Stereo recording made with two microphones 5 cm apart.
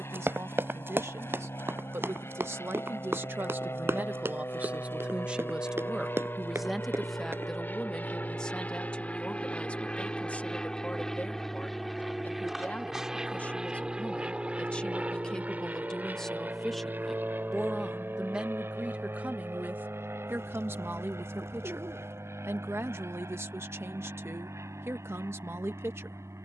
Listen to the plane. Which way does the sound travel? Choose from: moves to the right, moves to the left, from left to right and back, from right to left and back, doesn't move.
moves to the right.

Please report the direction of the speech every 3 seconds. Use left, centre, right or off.
right, right, centre, left, left, centre, right, right, right.